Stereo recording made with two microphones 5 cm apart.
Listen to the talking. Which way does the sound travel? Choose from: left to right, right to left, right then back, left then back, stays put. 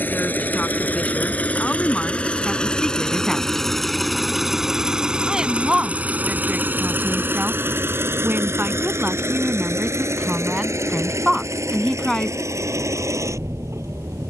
right then back.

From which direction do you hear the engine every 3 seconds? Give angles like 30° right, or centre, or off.
30° left, centre, 40° right, 70° right, 80° right.